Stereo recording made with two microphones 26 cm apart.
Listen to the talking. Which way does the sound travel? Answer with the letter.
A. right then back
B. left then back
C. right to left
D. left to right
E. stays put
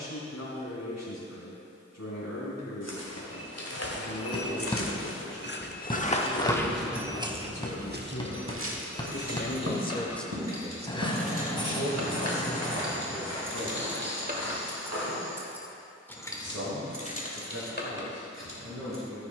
D.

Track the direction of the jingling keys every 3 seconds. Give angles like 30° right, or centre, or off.
off, off, off, 70° right, 40° right, 20° left, 50° left.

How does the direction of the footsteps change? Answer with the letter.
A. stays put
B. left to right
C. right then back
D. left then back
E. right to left
B.